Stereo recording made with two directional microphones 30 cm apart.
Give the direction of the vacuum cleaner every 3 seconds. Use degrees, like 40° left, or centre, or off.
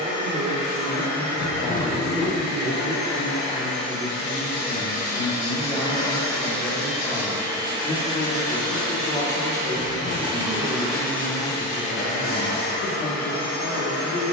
50° left, 30° left, 10° right, 10° right, 40° left.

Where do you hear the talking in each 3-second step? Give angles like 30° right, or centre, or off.
30° right, 10° right, 20° left, 50° left, 50° left.